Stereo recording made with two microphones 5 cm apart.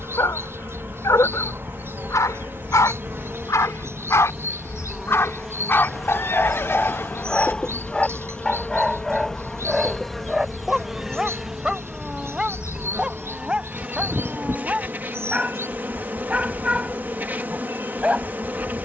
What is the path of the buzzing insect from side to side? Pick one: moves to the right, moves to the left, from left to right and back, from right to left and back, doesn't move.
from right to left and back.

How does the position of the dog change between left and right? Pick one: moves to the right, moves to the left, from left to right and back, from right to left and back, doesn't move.
moves to the right.